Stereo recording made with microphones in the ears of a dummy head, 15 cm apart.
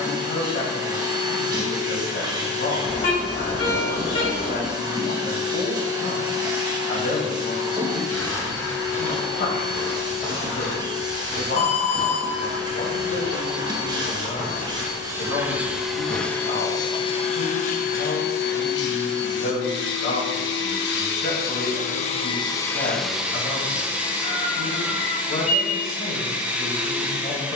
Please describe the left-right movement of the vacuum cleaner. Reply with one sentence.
You can hear the vacuum cleaner move from right to left and back again.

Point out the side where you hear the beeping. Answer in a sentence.
You can hear the beeping on the left.